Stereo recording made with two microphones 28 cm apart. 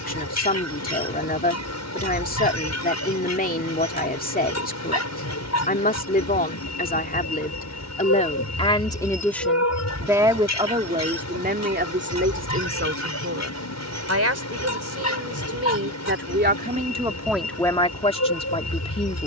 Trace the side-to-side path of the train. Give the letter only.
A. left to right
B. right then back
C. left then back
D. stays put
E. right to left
D.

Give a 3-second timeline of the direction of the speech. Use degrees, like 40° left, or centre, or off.
30° left, 30° left, 30° left, 20° right, 50° right, 30° right, 20° left.